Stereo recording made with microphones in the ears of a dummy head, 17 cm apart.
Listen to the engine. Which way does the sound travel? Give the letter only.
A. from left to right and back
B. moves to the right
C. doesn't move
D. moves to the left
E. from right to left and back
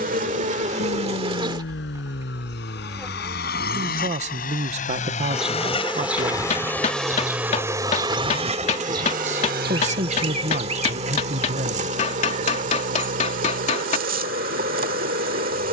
B.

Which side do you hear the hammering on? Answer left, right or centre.
left.